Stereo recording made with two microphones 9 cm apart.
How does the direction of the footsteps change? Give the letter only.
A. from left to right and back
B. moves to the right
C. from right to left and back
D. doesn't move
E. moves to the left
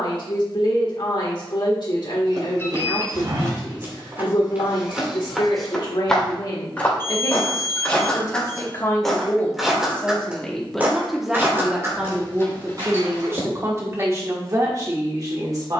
C.